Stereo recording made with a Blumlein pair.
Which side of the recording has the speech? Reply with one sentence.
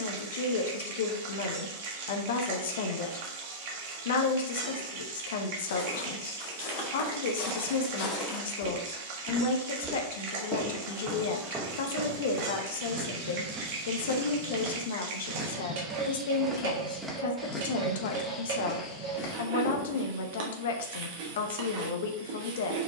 You can hear the speech on the left.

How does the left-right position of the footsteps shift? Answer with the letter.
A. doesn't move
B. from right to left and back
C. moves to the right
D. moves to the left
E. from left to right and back
E.